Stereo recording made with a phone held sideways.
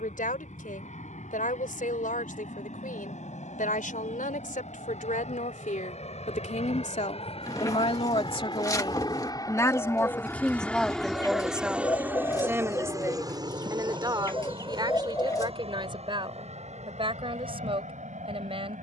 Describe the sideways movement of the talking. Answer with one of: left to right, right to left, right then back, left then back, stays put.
left to right.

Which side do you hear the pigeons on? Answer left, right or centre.
left.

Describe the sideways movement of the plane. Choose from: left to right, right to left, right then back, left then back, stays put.
left to right.